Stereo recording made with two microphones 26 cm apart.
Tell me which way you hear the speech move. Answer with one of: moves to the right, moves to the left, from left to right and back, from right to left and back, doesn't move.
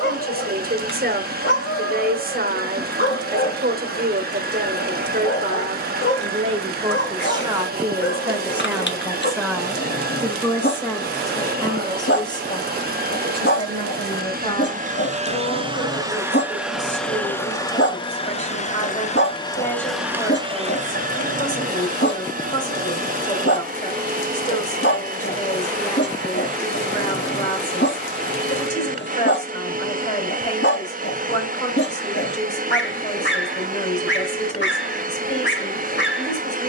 moves to the left.